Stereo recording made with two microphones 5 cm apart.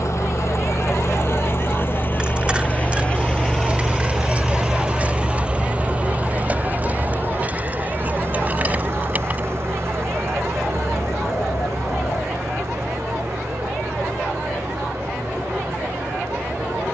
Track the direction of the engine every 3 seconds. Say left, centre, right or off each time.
left, centre, right, right, right, right.